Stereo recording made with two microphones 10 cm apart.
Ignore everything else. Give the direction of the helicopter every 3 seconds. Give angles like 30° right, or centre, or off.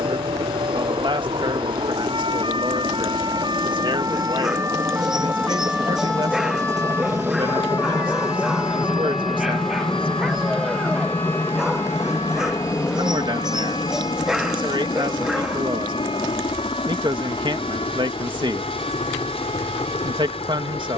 60° right, 40° right, 20° right, 10° left, 30° left, 50° left, 60° left.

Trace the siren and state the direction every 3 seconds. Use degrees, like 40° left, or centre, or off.
60° right, 30° right, 30° left, 60° left, 70° left, 80° left, 80° left.